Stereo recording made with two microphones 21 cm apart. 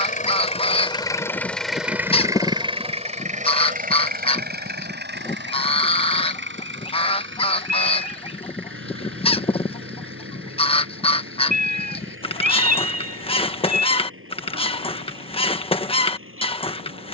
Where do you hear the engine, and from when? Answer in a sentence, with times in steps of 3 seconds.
In this clip you hear the engine in the centre from 0 s and on the right from 3 s.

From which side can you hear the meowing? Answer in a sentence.
In this clip you hear the meowing on the right.